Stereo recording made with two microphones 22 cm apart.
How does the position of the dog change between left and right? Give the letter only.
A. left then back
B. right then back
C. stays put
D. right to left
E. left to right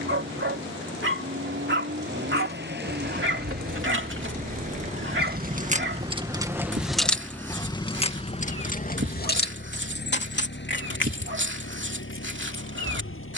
C.